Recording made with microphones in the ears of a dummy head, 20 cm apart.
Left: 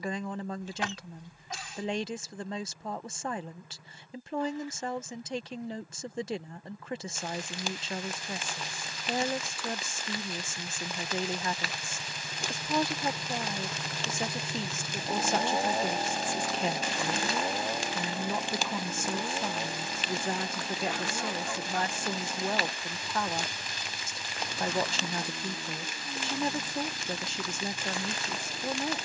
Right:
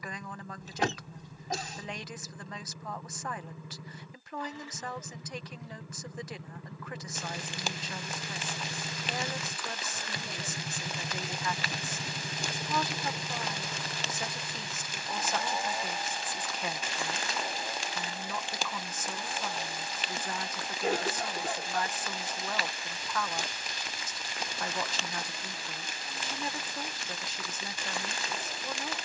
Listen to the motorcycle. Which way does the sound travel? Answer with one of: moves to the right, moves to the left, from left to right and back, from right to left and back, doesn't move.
moves to the left.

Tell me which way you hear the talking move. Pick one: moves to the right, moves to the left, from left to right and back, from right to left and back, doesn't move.
doesn't move.